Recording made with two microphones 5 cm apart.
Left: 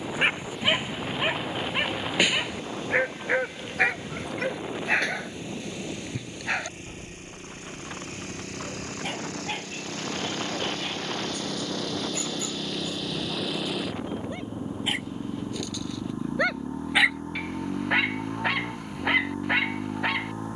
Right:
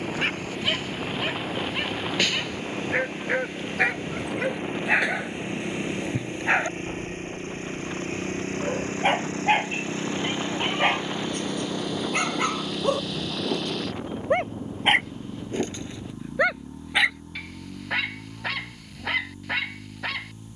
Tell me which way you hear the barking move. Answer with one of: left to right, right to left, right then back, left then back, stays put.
right then back.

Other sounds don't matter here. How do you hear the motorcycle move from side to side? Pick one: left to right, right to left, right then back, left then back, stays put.
right to left.